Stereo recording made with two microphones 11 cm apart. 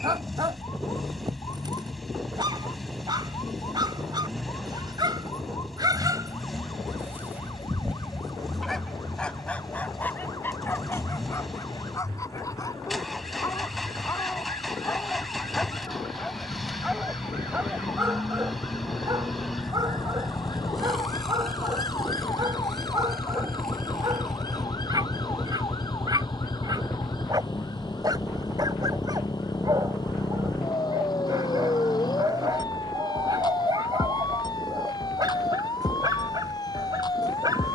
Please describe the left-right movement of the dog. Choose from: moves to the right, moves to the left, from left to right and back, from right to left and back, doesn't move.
from right to left and back.